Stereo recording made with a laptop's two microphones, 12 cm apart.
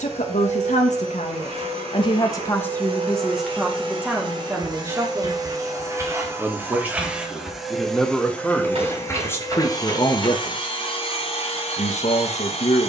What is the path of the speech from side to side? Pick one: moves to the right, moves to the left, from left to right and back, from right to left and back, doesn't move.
from left to right and back.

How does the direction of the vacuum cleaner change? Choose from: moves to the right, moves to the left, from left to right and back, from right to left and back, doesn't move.
moves to the left.